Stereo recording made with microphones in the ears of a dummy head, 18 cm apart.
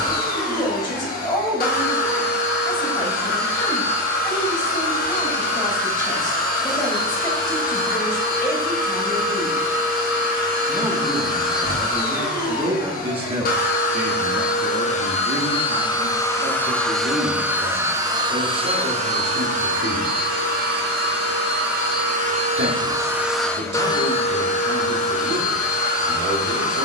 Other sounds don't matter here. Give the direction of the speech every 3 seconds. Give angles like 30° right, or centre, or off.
20° left, 20° left, 20° left, centre, 30° right, 60° right, 60° right, 60° right, 60° right.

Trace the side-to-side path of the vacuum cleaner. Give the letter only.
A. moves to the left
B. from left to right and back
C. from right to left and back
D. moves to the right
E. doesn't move
B.